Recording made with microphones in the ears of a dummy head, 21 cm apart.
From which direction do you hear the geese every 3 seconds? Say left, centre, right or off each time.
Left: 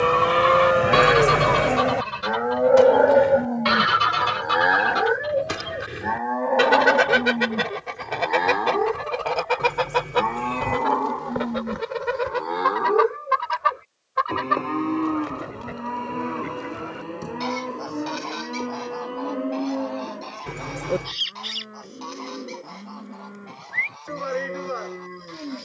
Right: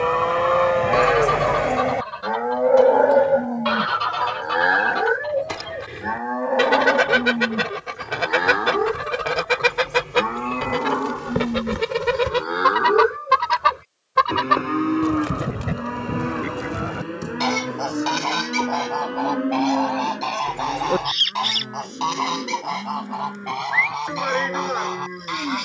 left, left, centre, right, right, right, right, right, right.